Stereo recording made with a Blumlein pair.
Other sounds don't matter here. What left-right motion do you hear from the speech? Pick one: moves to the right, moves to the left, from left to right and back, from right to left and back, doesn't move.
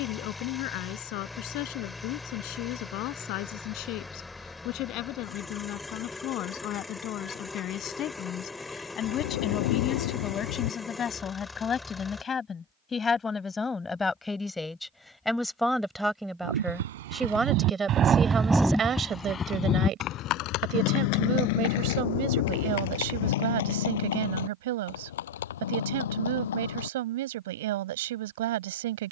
moves to the right.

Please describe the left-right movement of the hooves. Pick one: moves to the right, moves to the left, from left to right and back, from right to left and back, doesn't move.
moves to the left.